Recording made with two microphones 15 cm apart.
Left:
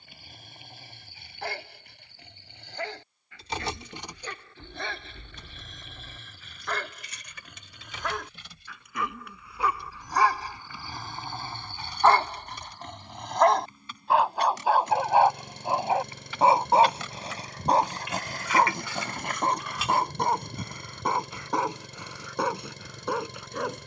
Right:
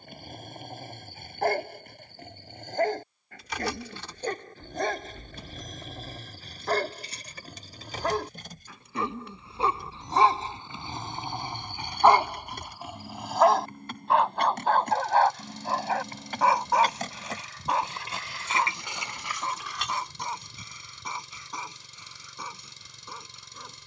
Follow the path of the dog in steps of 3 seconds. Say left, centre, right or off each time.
right, right, right, right, centre, left, left, left.